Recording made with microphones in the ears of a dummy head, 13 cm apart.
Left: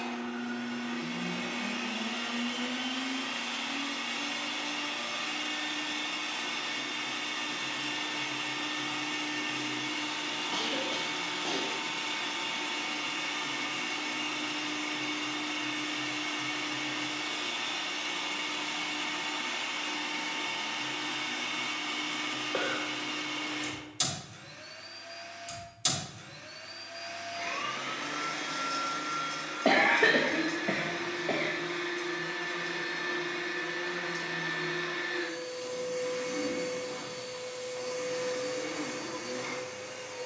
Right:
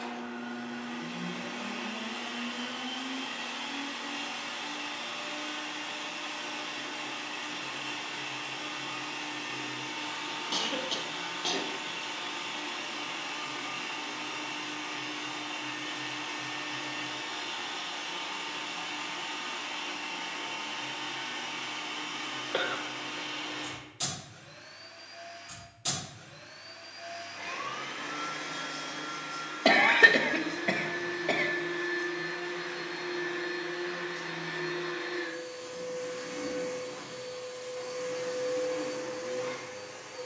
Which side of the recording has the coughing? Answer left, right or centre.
right.